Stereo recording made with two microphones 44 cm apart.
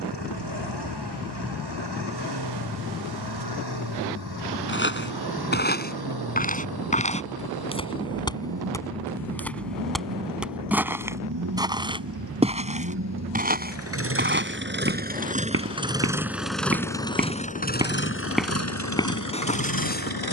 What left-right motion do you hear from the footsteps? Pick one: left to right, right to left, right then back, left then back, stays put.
right then back.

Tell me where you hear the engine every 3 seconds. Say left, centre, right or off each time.
right, right, right, right, right, centre, left.